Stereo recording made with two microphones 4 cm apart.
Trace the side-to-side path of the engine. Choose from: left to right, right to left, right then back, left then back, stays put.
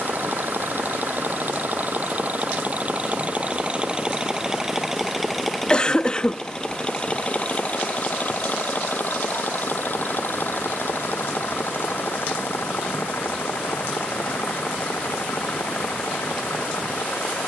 right to left.